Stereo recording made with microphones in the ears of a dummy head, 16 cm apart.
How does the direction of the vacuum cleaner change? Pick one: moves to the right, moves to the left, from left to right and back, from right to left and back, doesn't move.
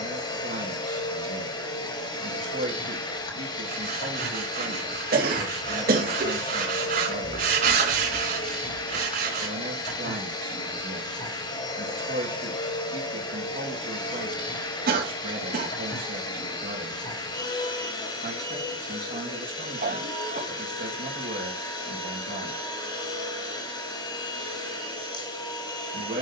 doesn't move.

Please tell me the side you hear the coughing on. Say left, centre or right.
right.